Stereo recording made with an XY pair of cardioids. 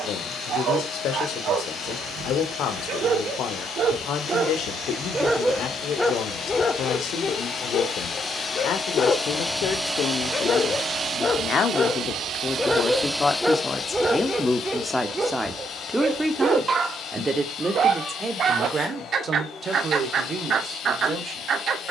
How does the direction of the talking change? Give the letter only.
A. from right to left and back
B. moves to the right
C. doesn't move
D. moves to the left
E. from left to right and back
B.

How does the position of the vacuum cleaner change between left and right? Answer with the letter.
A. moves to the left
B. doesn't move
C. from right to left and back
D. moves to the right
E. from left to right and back
E.